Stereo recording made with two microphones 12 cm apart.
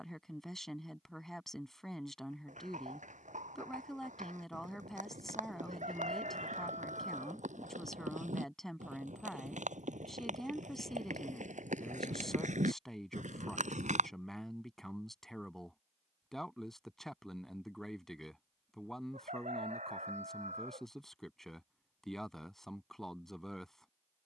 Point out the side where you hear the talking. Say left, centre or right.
centre.